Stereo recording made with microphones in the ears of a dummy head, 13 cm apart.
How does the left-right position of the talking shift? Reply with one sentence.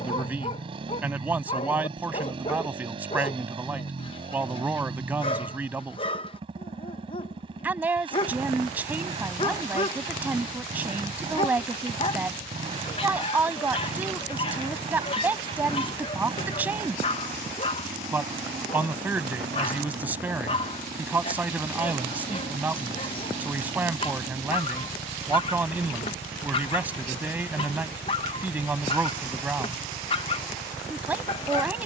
You can hear the talking stay in one place.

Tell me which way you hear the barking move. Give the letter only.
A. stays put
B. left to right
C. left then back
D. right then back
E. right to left
A.